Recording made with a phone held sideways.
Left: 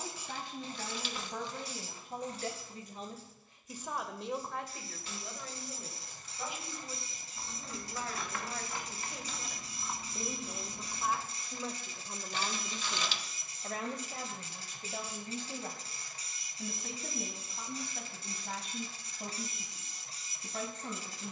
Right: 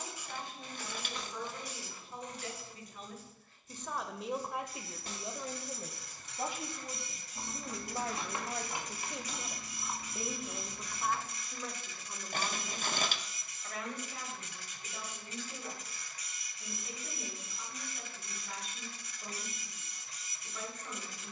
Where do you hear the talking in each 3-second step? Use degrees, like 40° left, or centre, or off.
60° left, 10° right, 40° right, centre, 40° left, 60° left, 60° left.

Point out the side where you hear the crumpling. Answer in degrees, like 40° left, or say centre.
50° right.